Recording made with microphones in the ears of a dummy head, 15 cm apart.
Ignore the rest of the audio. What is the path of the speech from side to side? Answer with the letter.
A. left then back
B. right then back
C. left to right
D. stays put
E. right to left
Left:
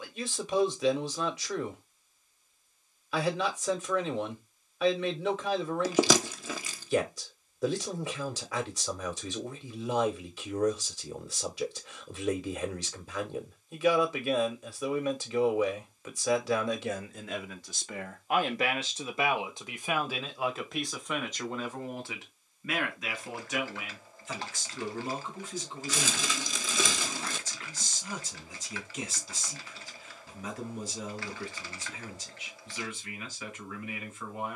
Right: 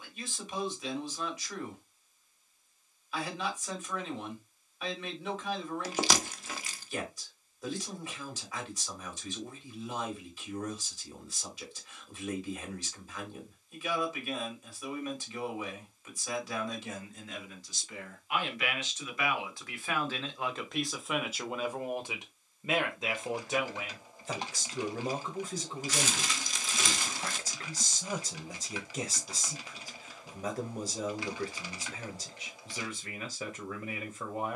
C.